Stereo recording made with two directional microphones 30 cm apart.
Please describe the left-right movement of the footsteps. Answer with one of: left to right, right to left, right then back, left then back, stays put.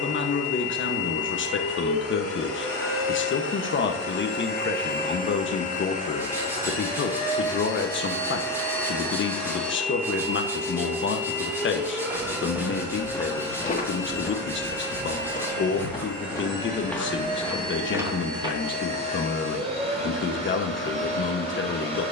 left then back.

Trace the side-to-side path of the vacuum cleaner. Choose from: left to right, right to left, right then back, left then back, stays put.
left to right.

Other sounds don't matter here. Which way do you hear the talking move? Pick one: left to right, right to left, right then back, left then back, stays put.
stays put.